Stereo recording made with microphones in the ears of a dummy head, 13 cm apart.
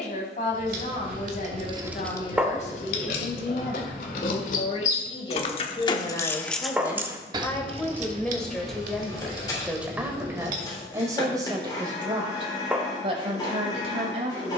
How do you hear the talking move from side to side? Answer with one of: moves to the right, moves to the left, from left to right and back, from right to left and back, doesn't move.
moves to the right.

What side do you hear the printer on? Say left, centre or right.
left.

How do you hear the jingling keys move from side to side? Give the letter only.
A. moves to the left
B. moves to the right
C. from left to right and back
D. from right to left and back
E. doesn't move
D.